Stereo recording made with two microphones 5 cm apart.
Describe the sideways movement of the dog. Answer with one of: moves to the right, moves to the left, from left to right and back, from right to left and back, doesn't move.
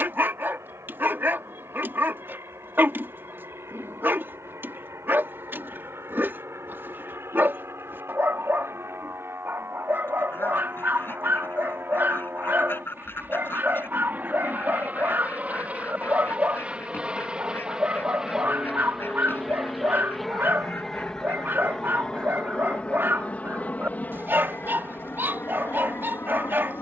doesn't move.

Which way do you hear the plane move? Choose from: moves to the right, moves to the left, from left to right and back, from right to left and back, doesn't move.
moves to the left.